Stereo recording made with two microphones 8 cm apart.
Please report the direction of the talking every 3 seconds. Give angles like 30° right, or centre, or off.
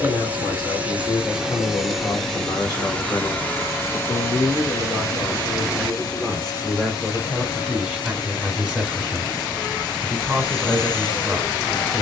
50° left, 20° left, centre, 10° right.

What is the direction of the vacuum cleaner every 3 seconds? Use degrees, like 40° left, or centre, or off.
10° right, 30° left, 50° left, 60° left.